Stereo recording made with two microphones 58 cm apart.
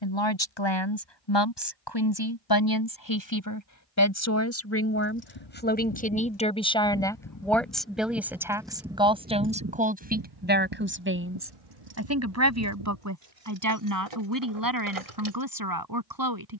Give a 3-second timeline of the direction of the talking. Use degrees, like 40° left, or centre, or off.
40° left, 30° left, centre, 20° right, 30° right, 40° right.